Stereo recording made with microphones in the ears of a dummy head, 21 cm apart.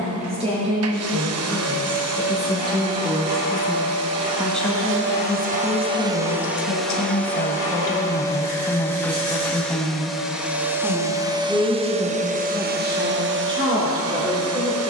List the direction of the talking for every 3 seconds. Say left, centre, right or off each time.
right, centre, left, centre, right.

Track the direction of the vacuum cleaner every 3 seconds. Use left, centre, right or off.
right, right, centre, centre, right.